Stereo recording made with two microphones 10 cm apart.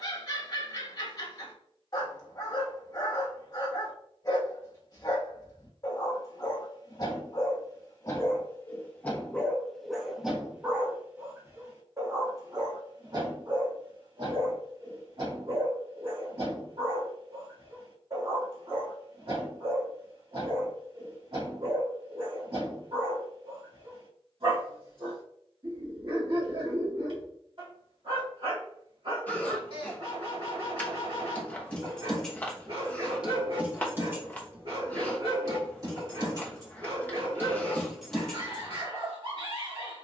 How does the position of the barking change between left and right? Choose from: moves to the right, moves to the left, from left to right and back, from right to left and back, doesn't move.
moves to the right.